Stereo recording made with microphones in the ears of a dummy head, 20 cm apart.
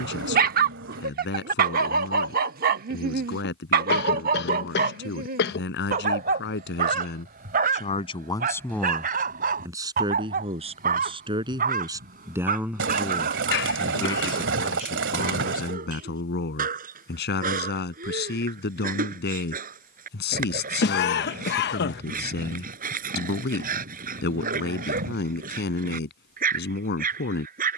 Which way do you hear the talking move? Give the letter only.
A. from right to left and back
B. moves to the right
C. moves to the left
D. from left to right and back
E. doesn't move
D.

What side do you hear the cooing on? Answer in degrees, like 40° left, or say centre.
60° right.